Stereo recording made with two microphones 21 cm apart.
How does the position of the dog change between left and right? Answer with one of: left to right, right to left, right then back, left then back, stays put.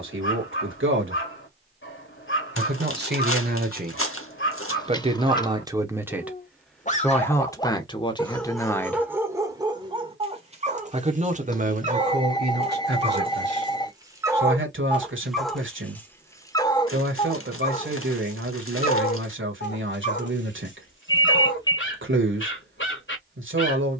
right then back.